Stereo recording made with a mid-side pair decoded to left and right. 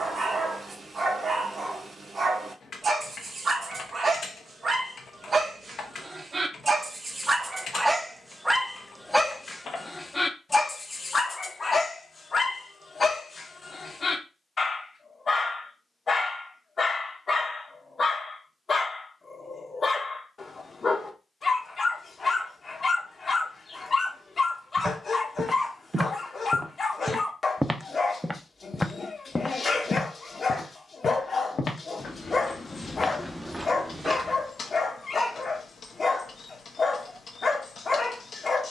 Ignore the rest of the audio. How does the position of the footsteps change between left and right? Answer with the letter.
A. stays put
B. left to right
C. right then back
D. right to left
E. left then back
E.